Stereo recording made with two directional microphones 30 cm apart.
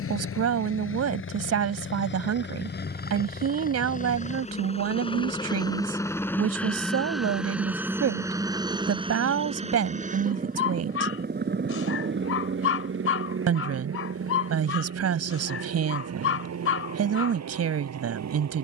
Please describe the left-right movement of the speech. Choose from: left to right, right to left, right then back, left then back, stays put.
stays put.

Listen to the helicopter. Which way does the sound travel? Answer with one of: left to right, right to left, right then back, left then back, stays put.
left to right.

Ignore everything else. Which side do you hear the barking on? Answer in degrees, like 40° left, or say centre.
50° left.